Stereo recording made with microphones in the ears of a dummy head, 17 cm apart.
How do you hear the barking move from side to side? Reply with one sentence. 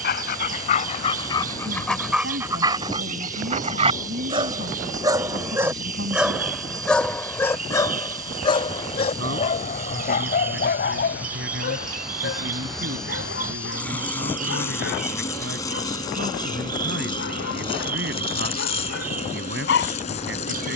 In this clip you hear the barking go right and come back.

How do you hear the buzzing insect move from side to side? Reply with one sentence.
In this clip you hear the buzzing insect move to the left.